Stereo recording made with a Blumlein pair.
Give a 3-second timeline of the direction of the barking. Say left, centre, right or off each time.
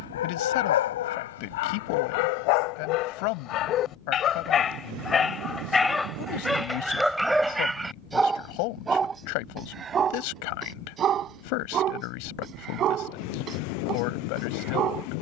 left, left, centre, right, right.